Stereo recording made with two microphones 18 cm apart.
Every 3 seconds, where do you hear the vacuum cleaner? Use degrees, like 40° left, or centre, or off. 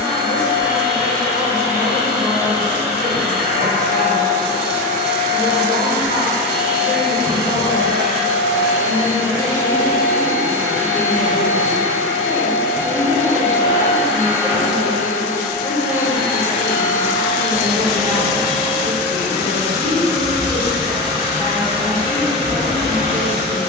20° left, 20° left, 20° left, 20° left, 20° left, 10° left, 10° right, 30° right.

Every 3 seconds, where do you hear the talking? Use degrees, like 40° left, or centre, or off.
50° left, 50° left, 50° left, 10° left, 30° right, 40° right, 40° right, 40° right.